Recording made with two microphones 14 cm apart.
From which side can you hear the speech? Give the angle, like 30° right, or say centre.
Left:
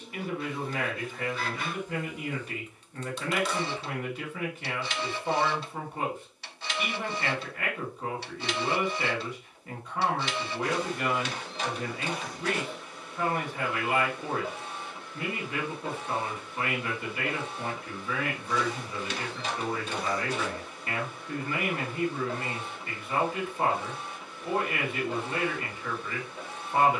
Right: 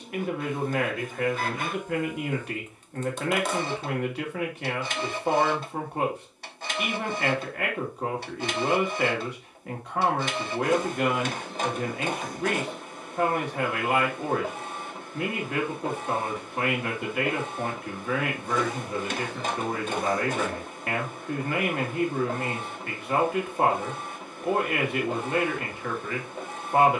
70° right.